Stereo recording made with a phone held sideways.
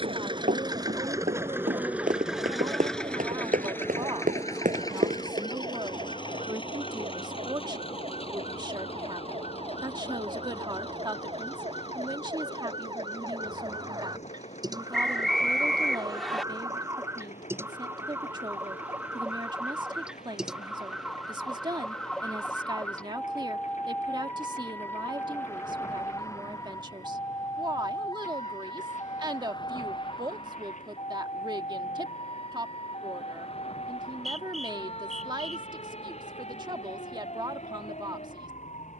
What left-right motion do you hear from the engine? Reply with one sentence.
You can hear the engine move from right to left.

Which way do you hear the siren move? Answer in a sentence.
In this clip you hear the siren move from right to left.